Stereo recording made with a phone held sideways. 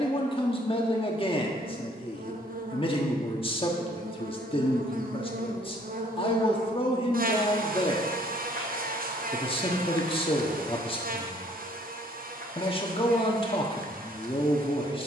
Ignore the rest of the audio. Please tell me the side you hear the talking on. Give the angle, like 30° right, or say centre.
30° left.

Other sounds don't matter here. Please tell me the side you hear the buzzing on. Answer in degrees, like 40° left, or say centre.
60° right.